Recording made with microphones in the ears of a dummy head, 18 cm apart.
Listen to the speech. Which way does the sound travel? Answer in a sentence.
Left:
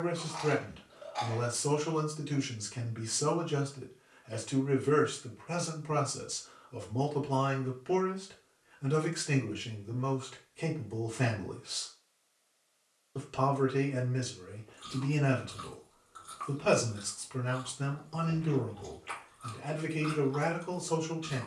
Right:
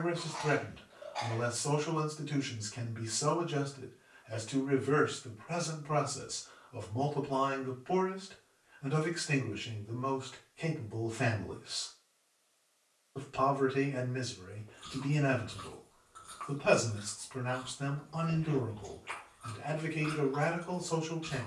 You can hear the speech stay put.